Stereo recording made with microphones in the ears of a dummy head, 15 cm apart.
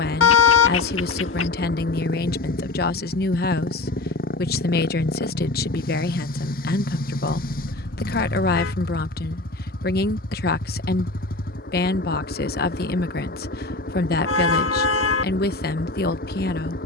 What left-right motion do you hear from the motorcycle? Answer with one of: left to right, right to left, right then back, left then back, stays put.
stays put.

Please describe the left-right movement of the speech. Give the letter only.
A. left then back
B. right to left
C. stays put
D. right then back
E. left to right
C.